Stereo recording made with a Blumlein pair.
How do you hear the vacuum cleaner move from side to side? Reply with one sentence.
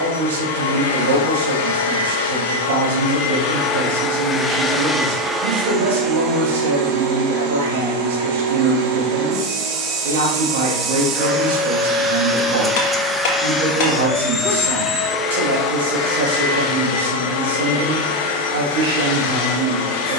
In this clip you hear the vacuum cleaner move from left to right and back again.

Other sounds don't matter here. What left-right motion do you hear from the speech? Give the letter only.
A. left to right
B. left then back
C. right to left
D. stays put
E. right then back
D.